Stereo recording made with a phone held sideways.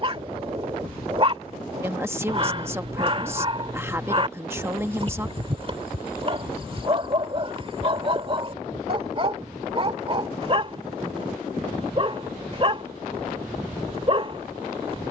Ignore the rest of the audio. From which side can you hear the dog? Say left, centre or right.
right.